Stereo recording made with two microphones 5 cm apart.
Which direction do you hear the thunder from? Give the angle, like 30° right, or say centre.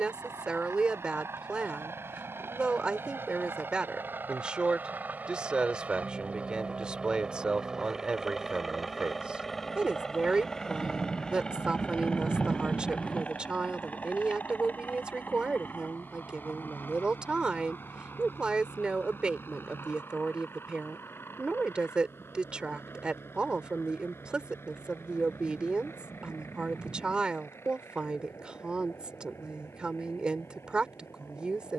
centre.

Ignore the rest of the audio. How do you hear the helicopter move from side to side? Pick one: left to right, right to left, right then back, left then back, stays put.
right to left.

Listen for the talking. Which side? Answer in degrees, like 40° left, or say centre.
20° right.